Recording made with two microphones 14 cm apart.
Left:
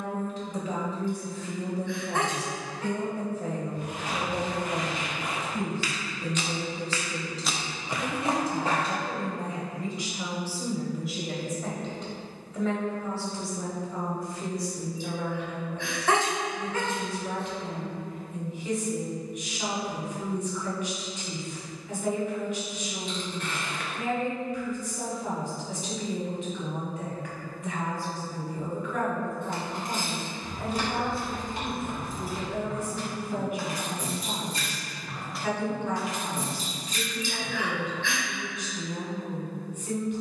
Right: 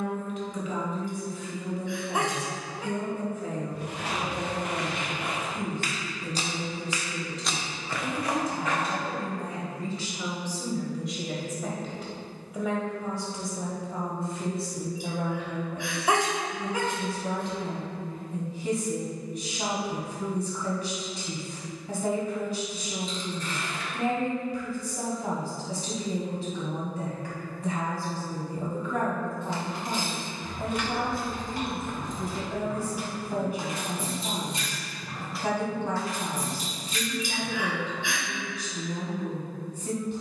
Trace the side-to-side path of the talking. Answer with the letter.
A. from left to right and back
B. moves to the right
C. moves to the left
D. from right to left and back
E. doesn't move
B.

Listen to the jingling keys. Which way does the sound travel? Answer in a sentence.
You can hear the jingling keys move from left to right and back again.